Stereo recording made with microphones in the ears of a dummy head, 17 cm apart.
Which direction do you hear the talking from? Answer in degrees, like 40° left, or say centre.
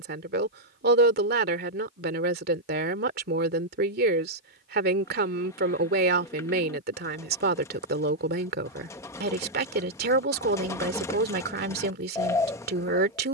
50° right.